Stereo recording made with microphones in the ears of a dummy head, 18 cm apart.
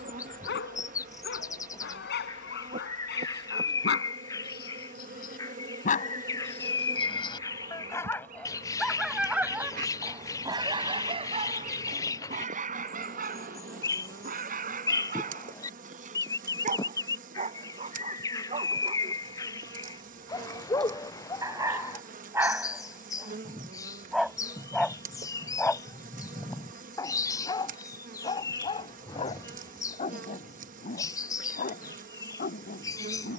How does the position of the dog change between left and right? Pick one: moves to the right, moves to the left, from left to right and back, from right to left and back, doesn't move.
from left to right and back.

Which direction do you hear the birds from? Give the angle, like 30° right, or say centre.
20° left.